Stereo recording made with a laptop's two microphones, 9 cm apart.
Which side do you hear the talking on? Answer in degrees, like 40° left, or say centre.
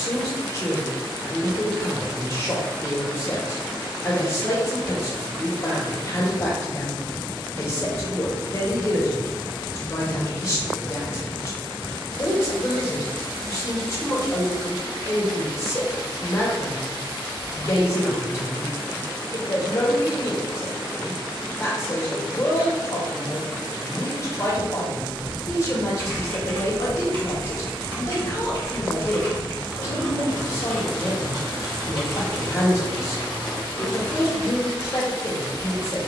30° left.